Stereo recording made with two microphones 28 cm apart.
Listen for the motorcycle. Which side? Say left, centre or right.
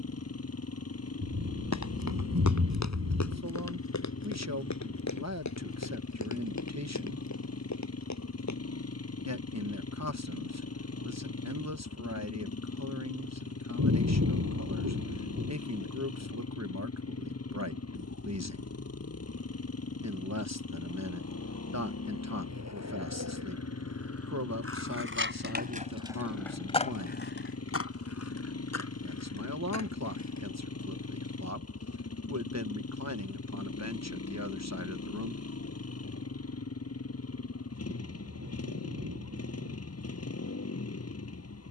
left.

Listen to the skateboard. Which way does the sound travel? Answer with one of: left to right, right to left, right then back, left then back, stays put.
right to left.